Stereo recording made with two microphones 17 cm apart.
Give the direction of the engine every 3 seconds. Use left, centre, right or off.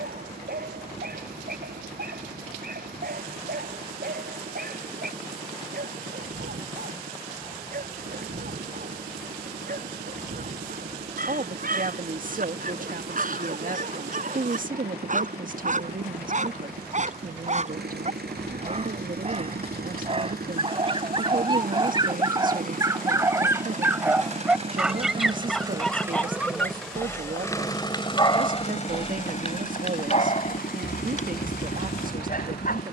right, right, right, right, right, right, right, right, right, left, left.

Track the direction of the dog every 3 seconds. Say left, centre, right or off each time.
right, right, right, right, right, right, right, right, centre, left, left.